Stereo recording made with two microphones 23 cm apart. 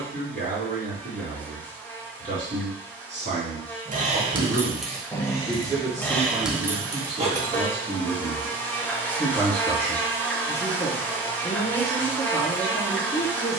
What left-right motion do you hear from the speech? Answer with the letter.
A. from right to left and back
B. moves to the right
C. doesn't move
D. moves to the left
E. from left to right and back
D.